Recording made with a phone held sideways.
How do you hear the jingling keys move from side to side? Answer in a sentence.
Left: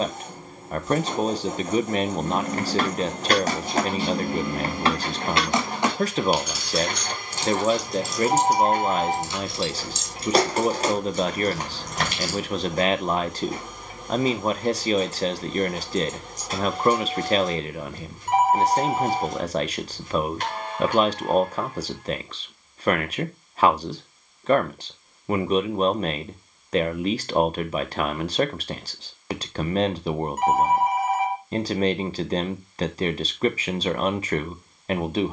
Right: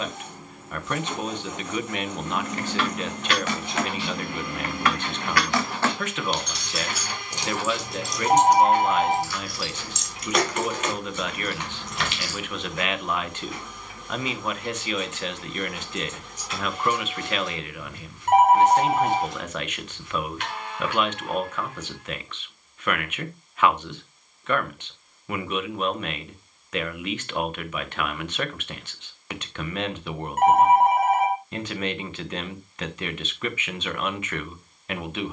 In this clip you hear the jingling keys move from left to right and back again.